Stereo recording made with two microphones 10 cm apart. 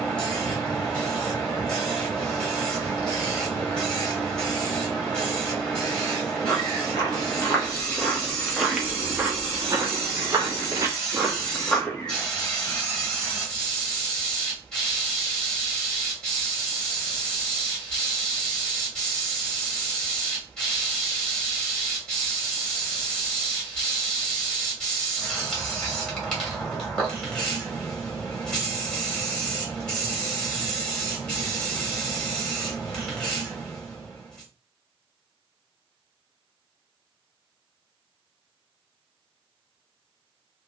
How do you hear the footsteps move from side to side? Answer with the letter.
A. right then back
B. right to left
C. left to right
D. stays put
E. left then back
A.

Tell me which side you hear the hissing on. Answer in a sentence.
You can hear the hissing in the centre.